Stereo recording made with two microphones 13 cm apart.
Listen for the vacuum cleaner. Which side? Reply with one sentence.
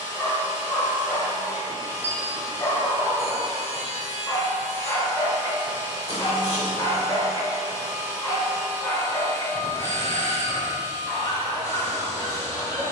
In this clip you hear the vacuum cleaner on the left.